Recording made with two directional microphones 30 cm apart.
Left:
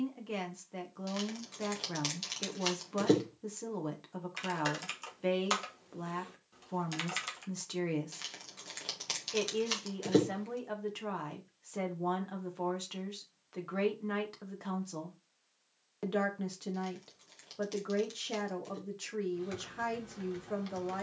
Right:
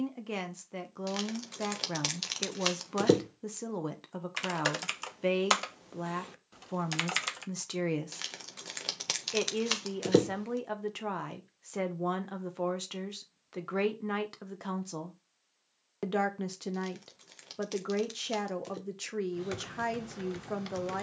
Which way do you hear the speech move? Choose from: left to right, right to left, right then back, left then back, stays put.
stays put.